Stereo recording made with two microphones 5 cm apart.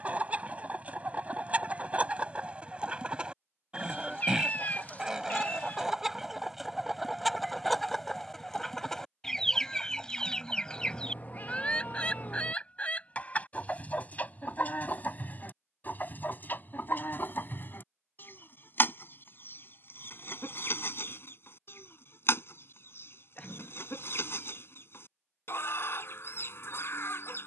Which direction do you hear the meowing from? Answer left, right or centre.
left.